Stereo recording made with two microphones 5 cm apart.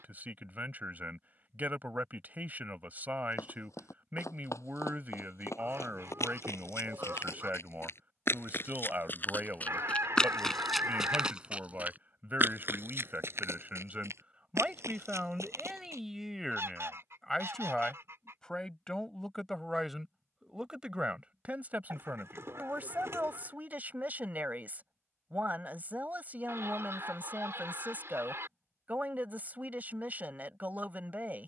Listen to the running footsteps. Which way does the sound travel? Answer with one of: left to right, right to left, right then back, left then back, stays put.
left to right.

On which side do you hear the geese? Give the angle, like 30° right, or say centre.
60° right.